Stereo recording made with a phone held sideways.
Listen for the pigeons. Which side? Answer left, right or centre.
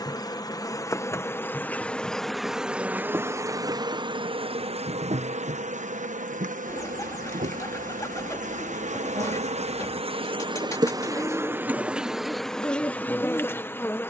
left.